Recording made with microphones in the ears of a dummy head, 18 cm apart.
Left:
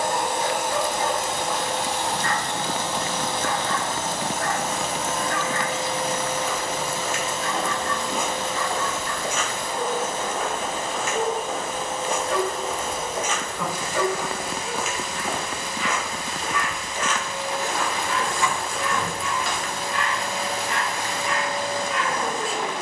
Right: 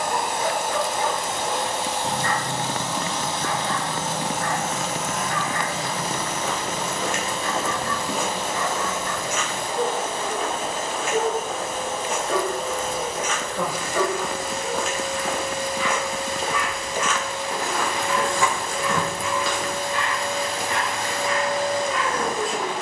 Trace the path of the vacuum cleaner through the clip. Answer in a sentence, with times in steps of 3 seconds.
In this clip you hear the vacuum cleaner on the left from 0 s, in the centre from 6 s and on the right from 9 s.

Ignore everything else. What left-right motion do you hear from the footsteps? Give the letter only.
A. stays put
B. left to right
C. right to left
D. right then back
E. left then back
E.